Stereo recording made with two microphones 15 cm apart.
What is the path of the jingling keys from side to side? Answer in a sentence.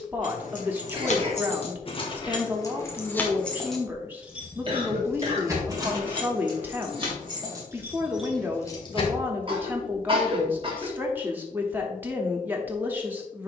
You can hear the jingling keys move from left to right and back again.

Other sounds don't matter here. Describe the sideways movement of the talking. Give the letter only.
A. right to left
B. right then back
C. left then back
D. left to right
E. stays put
E.